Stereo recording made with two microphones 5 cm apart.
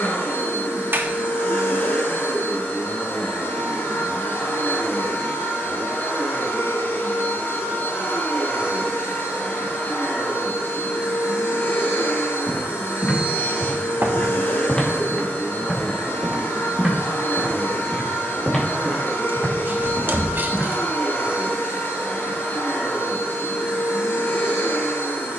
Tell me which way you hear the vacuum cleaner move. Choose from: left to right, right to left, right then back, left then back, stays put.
stays put.